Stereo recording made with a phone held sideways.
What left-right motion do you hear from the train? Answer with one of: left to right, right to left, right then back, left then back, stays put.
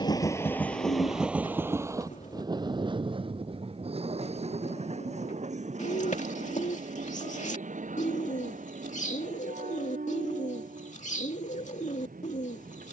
left to right.